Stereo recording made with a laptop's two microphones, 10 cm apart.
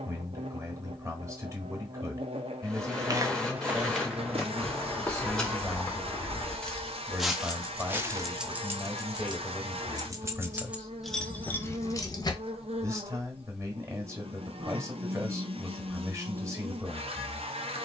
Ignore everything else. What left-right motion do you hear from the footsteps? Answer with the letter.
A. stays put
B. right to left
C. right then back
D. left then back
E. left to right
D.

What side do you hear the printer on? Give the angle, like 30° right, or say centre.
10° left.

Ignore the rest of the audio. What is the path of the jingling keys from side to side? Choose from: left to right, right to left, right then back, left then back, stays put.
right then back.